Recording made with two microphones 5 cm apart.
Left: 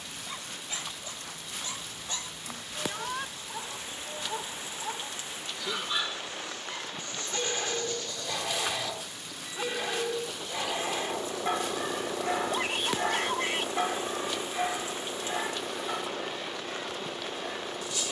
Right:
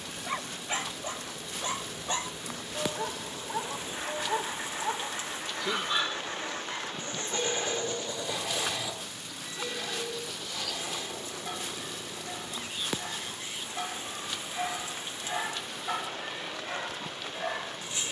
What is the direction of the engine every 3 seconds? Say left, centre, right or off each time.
right, right, right, left, left, left.